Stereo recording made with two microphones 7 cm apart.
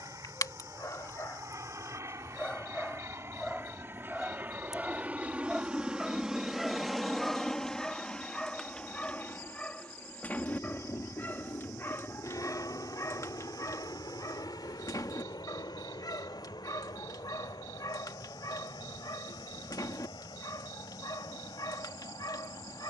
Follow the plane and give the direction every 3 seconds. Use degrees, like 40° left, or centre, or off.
50° right, 30° right, 10° left, 30° left, 50° left, 60° left, 70° left, 70° left.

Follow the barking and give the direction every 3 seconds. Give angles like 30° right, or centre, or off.
40° left, centre, 10° left, 20° left, 50° left, 60° left, 60° left, 60° left.